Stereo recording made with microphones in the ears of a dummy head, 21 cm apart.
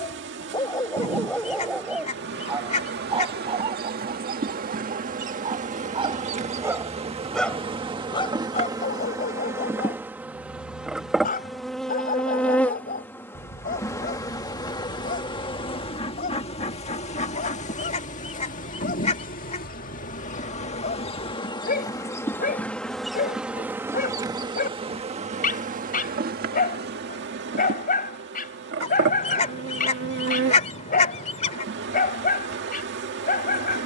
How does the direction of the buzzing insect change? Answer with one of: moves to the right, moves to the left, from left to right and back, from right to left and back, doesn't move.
from right to left and back.